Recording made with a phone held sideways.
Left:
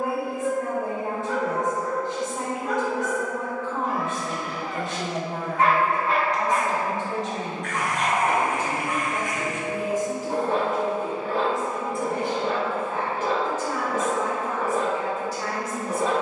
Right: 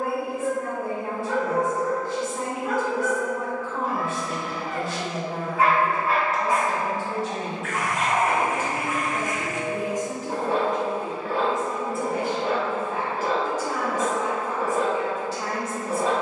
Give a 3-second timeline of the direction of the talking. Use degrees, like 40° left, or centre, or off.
20° left, 20° left, 20° left, 10° left, 10° right, 30° right.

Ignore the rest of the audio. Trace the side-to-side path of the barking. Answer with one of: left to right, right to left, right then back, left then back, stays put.
stays put.